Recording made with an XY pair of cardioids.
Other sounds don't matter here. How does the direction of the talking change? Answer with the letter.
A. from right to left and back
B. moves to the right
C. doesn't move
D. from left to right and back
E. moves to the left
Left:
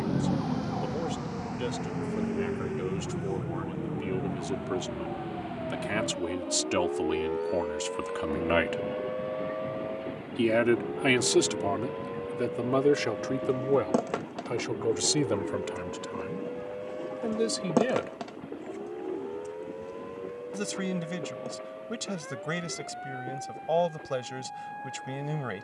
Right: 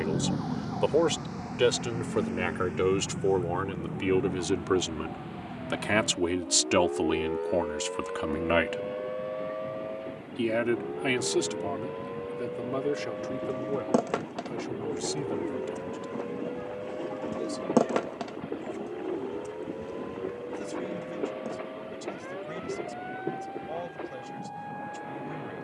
E.